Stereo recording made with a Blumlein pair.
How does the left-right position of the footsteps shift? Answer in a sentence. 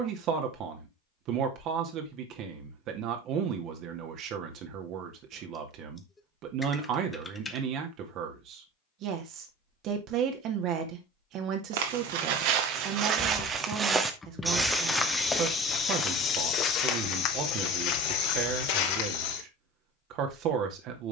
In this clip you hear the footsteps go from the right side to the left.